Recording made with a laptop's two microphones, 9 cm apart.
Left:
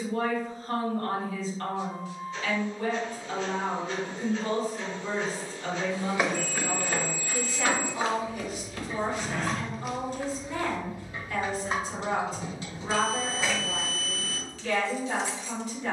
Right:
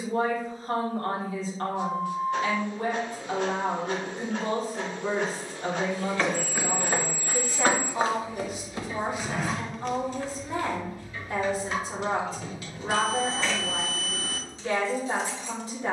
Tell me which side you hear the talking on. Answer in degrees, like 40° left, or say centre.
40° right.